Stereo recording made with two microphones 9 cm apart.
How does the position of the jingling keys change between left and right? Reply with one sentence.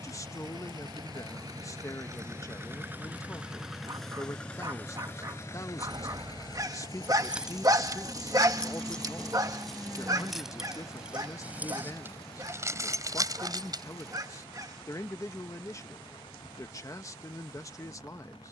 You can hear the jingling keys move from right to left and back again.